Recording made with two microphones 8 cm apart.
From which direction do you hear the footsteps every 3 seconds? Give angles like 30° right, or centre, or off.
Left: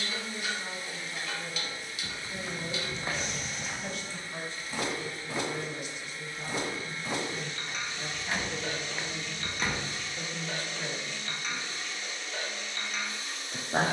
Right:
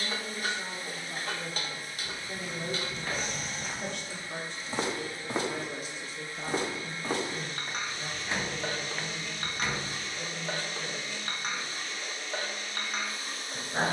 40° left, 20° right, 40° right, 20° left, off.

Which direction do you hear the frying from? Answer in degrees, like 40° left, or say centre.
40° right.